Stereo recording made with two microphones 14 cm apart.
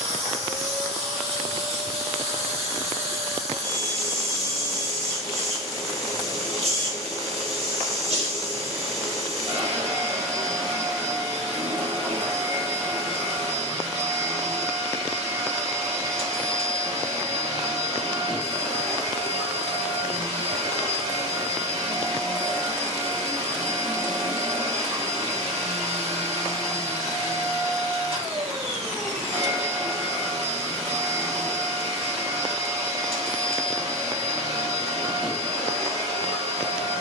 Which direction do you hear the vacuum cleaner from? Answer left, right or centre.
right.